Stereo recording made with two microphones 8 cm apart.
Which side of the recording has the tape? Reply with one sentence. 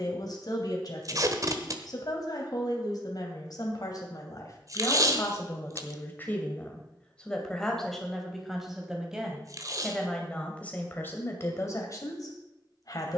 In this clip you hear the tape on the right.